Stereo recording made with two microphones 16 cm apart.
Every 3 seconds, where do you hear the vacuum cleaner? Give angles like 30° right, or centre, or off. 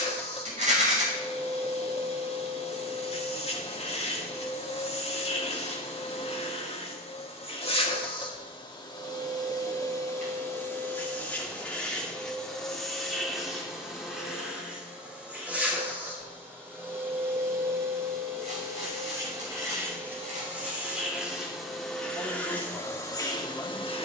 40° left, 40° left, 40° left, 20° left, centre, 10° right, 20° right, 10° left.